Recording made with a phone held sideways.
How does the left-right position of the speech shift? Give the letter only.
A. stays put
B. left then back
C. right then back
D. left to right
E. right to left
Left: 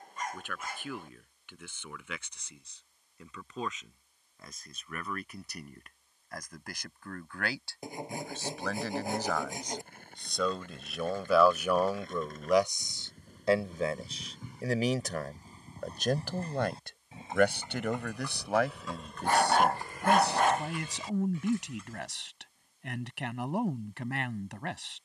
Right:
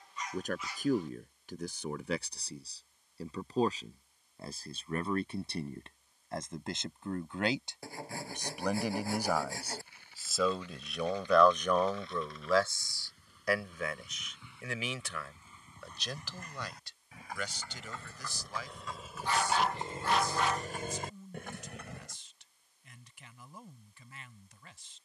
E.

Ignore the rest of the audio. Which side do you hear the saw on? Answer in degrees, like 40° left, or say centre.
20° left.